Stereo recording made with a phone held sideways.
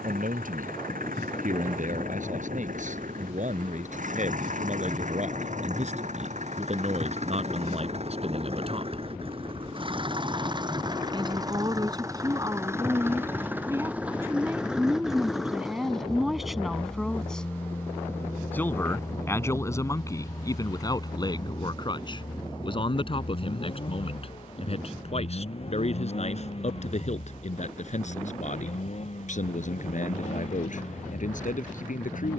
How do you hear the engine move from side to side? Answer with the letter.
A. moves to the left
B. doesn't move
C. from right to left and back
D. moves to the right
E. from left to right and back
A.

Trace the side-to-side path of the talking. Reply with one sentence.
In this clip you hear the talking travel towards the left.